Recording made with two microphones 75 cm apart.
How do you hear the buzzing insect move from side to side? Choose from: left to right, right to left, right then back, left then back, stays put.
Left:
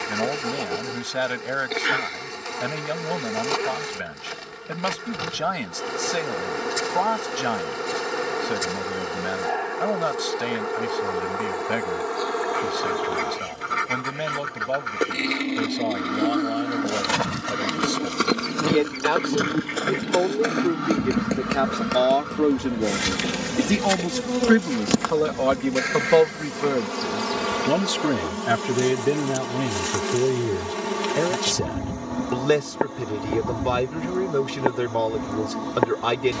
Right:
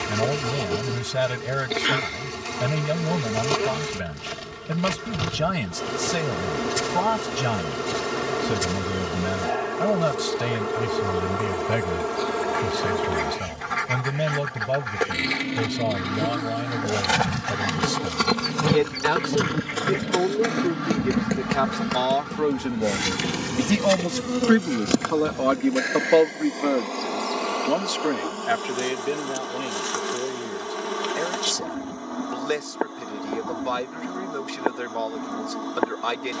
right to left.